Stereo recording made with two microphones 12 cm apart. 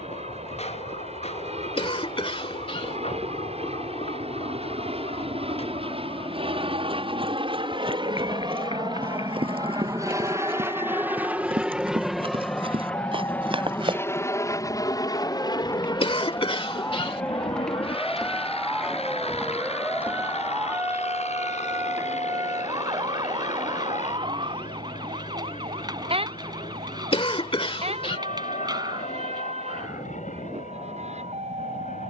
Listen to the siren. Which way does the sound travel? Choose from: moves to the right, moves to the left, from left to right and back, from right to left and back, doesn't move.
moves to the right.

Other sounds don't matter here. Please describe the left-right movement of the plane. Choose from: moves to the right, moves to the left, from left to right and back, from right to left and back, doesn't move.
moves to the left.